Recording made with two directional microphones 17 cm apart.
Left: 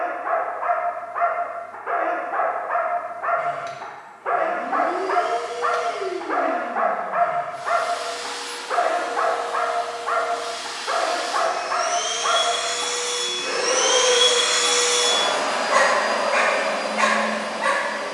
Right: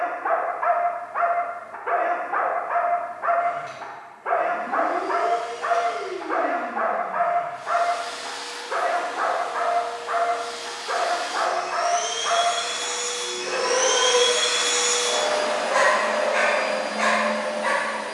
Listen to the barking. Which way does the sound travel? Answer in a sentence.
You can hear the barking go from the right side to the left.